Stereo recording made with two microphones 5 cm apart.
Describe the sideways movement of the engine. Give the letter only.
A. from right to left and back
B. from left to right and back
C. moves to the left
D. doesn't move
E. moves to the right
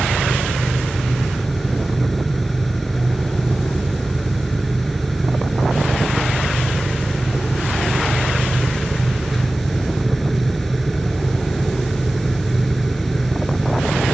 D.